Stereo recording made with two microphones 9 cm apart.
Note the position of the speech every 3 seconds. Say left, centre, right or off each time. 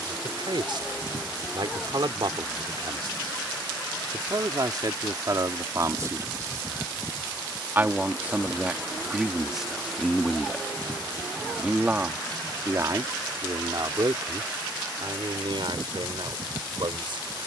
right, right, right, centre, right, right.